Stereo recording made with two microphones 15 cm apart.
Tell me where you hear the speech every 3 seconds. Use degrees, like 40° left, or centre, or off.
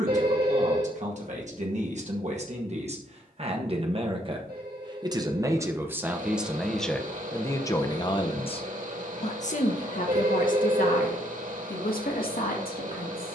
50° right, 30° right, 10° left, 60° left, 80° left.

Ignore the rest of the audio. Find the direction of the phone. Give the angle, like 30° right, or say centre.
80° right.